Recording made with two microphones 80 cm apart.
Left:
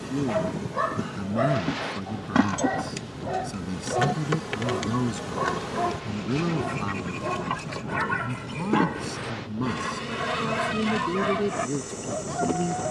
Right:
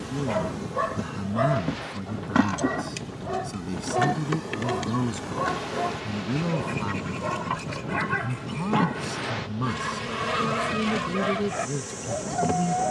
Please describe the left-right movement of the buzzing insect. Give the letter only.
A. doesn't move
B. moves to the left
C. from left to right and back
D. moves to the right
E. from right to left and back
E.